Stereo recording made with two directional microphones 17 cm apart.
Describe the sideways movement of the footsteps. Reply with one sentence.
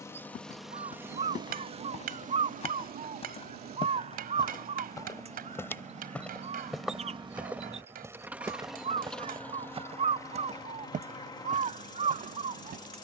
You can hear the footsteps move to the right.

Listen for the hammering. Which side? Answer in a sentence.
In this clip you hear the hammering on the right.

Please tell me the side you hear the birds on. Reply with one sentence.
In this clip you hear the birds on the right.